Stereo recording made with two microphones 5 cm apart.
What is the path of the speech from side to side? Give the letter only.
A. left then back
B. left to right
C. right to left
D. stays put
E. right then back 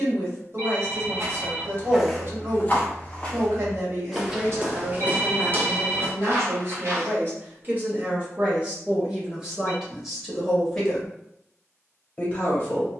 C.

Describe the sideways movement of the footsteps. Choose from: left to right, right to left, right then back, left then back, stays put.
left then back.